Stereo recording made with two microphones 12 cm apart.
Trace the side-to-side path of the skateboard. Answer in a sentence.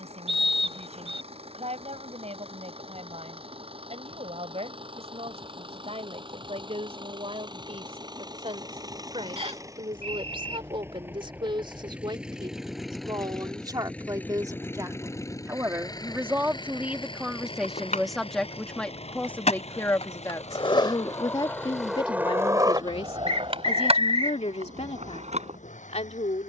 In this clip you hear the skateboard move from left to right.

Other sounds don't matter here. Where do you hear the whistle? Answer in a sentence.
In this clip you hear the whistle on the right.